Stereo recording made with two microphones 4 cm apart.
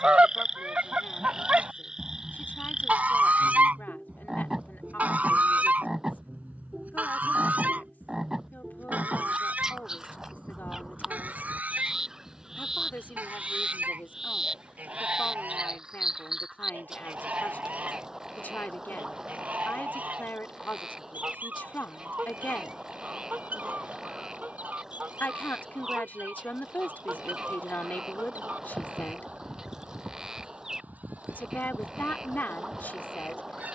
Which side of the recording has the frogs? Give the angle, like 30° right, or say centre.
10° right.